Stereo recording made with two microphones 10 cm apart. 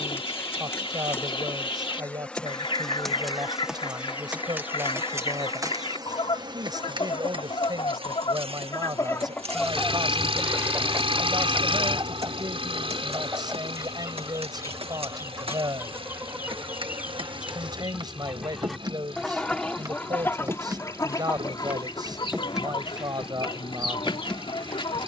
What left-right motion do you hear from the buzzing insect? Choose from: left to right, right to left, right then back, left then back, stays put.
right then back.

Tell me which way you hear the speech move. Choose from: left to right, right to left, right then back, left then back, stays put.
stays put.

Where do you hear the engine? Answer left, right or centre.
right.